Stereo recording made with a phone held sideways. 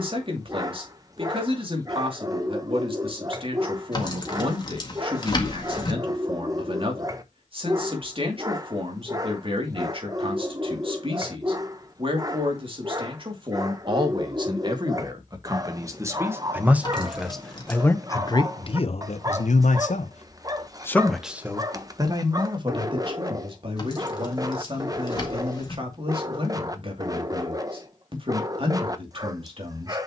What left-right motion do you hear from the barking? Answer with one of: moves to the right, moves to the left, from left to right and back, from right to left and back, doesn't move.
doesn't move.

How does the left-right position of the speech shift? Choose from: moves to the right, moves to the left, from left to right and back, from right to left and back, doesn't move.
from right to left and back.